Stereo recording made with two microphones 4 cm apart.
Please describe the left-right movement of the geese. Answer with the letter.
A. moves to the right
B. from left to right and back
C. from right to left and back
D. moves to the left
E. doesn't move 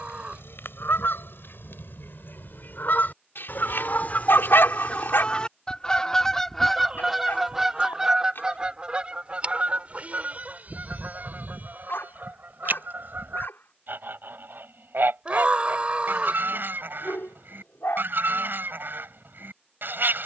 A.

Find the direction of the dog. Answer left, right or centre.
left.